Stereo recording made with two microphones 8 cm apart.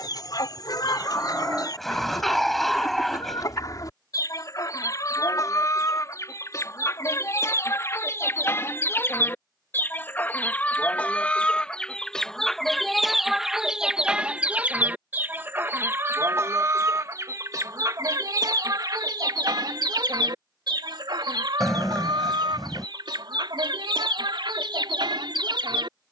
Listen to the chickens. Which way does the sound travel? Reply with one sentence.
You can hear the chickens travel towards the right.